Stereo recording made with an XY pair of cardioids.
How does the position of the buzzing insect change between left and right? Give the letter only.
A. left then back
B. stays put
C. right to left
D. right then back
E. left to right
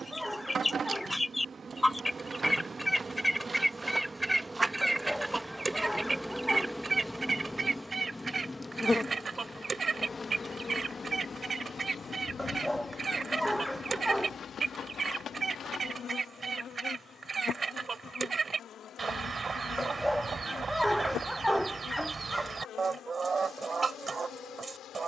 C.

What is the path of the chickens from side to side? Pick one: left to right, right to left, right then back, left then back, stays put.
left to right.